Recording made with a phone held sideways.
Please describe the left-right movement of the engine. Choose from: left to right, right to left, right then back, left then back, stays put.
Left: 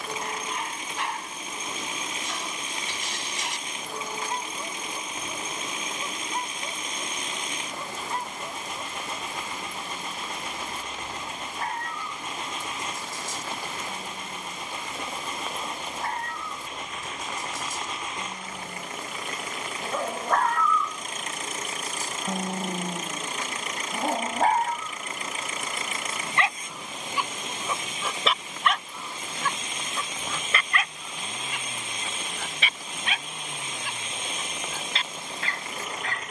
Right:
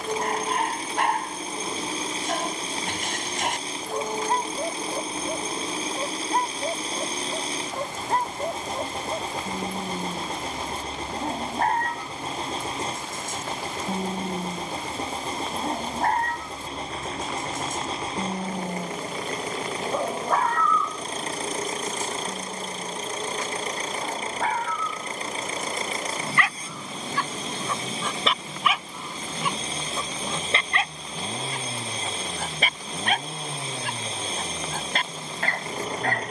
stays put.